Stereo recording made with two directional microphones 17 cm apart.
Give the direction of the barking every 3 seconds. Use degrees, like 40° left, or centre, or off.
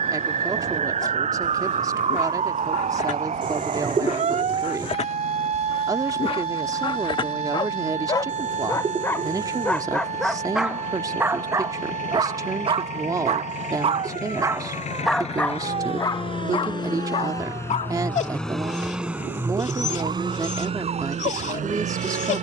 50° left, 40° left, 30° left, centre, 30° right, 30° left, 40° left, 40° left.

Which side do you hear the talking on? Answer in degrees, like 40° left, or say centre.
20° right.